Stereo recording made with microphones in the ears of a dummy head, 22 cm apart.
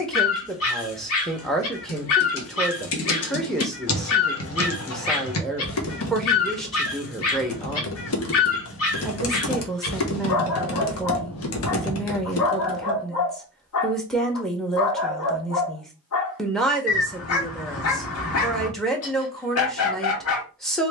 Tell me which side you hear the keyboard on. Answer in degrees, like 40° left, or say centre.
60° left.